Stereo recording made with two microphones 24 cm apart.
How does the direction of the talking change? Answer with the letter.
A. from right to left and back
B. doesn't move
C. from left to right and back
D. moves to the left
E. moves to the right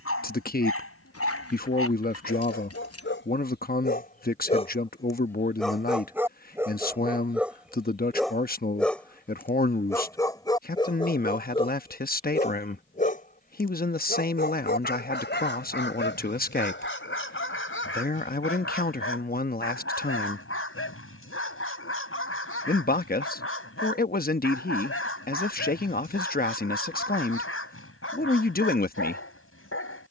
B.